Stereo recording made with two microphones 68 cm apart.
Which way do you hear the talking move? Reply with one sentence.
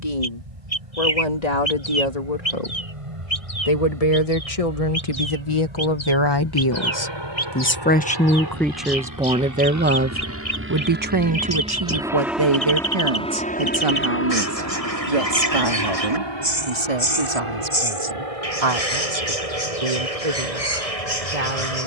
You can hear the talking move to the right.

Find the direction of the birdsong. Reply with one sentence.
You can hear the birdsong on the left.